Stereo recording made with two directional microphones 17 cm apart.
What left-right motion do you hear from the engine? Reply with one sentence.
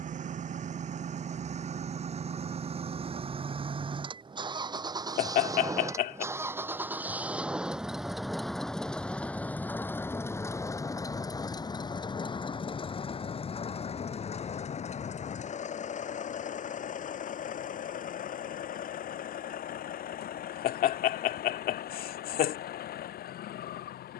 In this clip you hear the engine move from right to left.